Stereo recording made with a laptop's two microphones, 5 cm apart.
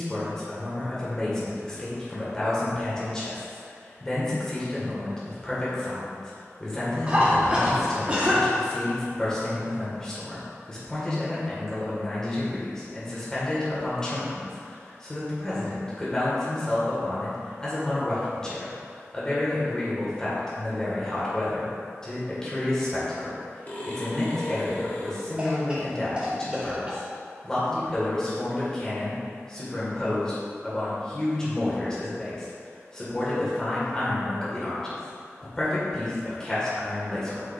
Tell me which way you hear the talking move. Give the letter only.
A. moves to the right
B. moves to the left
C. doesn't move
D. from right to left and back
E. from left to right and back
C.